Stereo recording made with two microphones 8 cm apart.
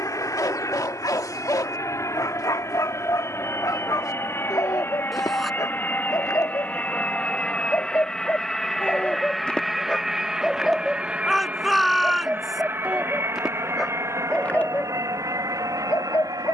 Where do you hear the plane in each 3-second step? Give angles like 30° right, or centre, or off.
40° left, 30° left, 10° left, 10° right, 30° right, 50° right.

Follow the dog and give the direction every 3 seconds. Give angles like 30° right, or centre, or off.
50° left, 50° left, 40° left, 10° left, centre, 40° left.